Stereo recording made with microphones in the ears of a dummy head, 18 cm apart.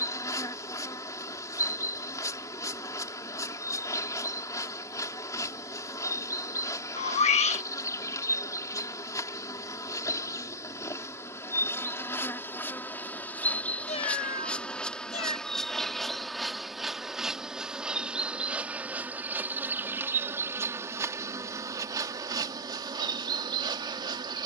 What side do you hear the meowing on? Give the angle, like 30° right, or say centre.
30° left.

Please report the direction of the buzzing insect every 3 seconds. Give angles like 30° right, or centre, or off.
20° left, 20° left, 20° left, 20° left, 10° left, centre, 10° right, 20° right.